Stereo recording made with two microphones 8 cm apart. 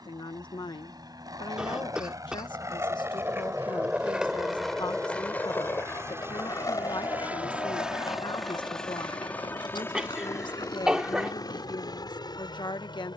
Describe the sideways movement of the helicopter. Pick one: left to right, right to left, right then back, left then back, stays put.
right to left.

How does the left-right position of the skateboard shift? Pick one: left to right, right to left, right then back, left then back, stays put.
right to left.